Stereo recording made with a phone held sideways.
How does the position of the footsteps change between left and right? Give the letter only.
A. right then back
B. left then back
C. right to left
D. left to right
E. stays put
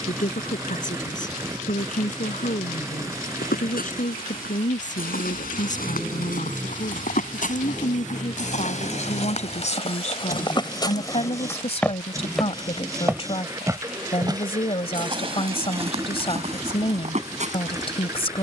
D.